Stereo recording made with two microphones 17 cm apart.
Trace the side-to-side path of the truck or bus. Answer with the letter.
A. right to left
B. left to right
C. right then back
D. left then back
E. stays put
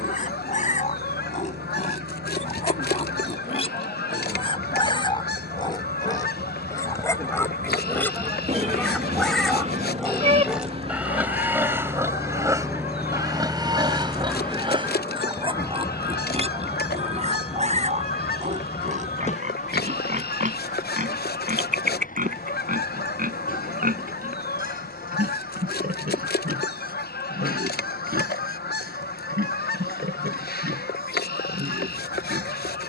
A.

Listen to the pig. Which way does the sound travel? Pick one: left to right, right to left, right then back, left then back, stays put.
left to right.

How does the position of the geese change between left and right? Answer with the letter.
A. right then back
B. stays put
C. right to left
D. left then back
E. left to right
B.